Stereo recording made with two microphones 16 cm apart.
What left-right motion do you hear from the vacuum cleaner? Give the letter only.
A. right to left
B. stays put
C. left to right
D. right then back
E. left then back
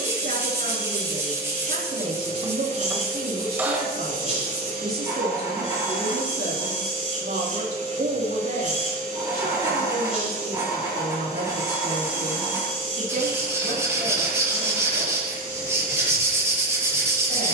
B.